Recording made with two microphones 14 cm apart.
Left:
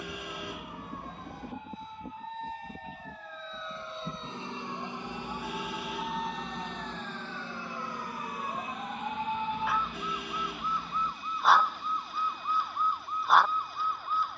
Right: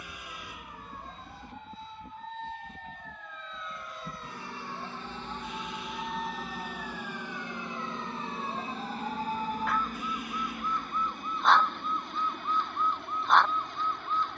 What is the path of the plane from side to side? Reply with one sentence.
In this clip you hear the plane move from left to right.